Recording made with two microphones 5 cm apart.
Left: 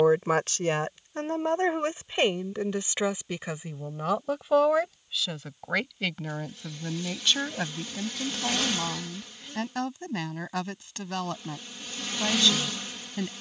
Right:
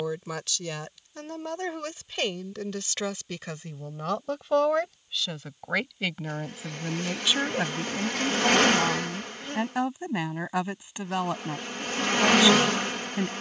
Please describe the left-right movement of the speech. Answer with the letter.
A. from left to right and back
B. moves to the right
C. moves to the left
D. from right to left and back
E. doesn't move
B.